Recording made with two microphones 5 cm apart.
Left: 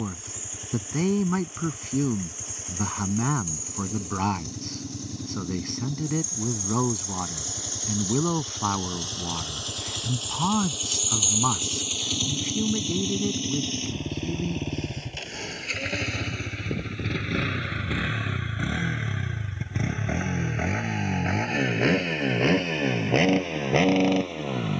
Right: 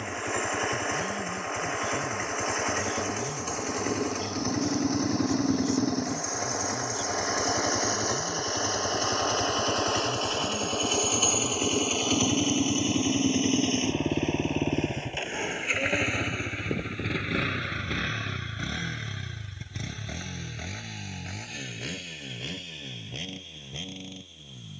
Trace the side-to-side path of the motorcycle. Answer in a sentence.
You can hear the motorcycle go from the right side to the left.